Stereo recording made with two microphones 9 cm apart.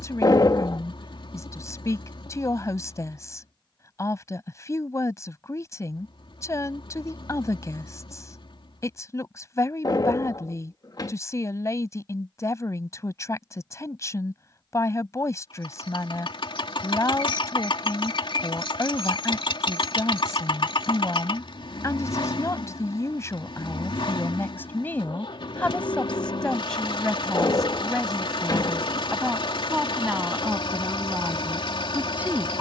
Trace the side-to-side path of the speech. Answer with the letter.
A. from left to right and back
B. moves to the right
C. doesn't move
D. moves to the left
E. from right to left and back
B.